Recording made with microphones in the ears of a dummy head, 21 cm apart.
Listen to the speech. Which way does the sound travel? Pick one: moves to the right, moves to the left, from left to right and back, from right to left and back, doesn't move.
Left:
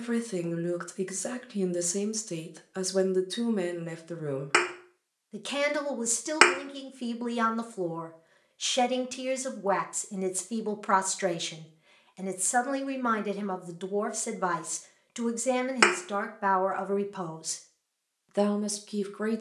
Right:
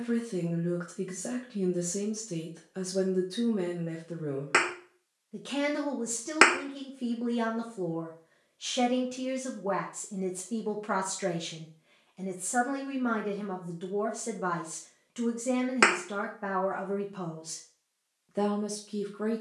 doesn't move.